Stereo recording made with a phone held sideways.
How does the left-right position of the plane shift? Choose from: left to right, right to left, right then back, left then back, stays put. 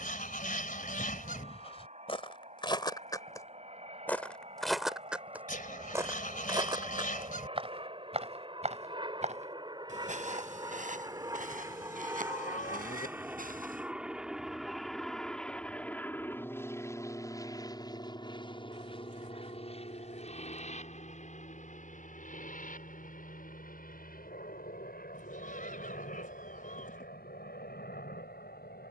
right to left.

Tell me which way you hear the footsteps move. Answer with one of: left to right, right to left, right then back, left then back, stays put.
left to right.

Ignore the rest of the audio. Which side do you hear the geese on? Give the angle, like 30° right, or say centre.
60° left.